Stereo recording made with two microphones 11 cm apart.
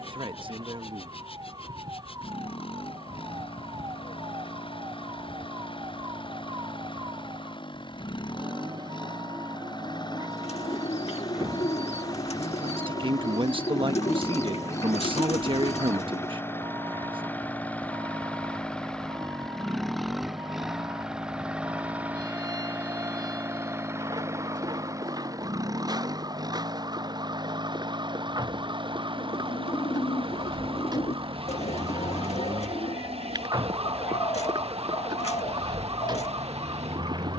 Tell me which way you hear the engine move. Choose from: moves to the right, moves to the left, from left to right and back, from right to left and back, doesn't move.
moves to the right.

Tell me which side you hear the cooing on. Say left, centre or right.
left.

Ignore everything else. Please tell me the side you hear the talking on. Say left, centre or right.
right.